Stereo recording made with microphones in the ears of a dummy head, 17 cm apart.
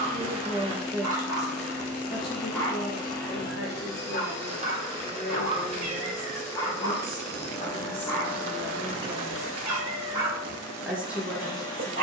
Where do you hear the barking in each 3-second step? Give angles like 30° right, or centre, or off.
10° right, 30° left, 20° left, 20° right.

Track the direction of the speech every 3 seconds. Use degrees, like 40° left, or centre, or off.
centre, 50° left, 30° left, centre.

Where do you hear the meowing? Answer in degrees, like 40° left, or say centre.
30° right.